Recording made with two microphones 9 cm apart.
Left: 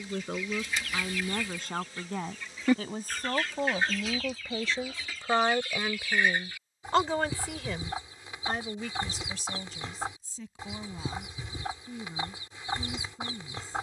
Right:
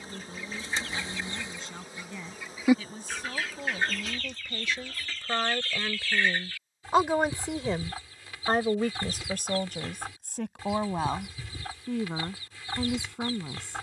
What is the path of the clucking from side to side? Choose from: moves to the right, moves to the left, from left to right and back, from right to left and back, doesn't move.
moves to the left.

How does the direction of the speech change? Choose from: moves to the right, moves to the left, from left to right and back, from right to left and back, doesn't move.
moves to the right.